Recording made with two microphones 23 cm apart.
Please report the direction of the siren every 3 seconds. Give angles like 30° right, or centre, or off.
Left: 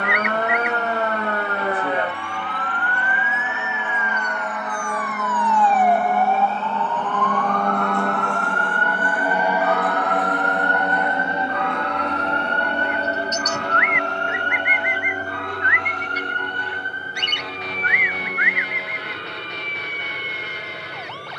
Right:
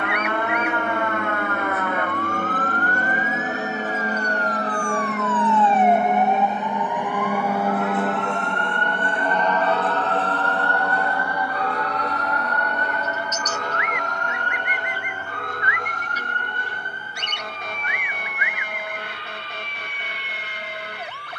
30° left, 10° left, 20° right, 30° right, 40° right, 50° right, 50° right.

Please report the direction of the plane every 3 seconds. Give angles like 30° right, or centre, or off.
60° right, 40° right, 10° right, 20° left, 30° left, 40° left, 50° left.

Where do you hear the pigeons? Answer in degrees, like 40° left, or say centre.
70° left.